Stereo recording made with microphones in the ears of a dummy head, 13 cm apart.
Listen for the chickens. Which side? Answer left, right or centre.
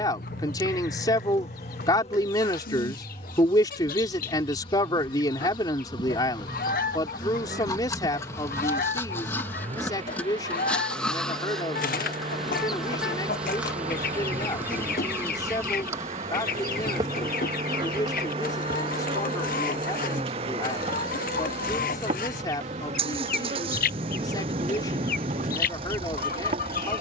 left.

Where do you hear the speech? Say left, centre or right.
left.